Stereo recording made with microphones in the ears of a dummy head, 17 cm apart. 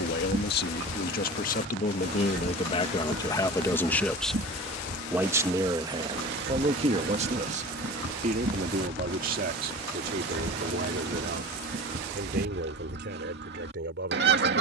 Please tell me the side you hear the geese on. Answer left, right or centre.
right.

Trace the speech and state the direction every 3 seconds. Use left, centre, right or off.
left, centre, right, right, right.